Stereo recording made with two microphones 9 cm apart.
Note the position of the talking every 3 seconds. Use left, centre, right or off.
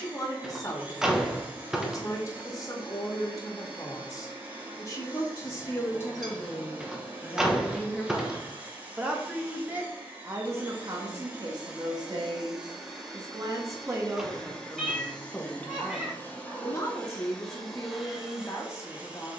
left, left, centre, right, right, left, left.